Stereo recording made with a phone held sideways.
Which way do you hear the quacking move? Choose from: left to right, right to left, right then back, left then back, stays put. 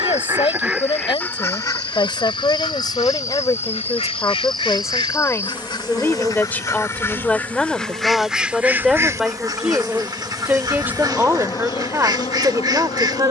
left then back.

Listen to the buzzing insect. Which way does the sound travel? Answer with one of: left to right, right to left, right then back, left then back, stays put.
right then back.